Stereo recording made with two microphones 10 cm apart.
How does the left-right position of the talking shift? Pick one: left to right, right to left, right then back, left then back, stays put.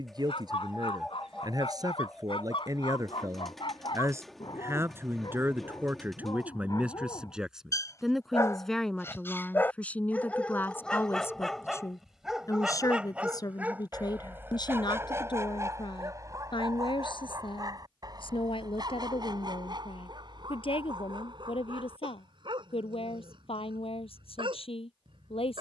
right to left.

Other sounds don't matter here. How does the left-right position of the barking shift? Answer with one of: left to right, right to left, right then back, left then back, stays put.
left to right.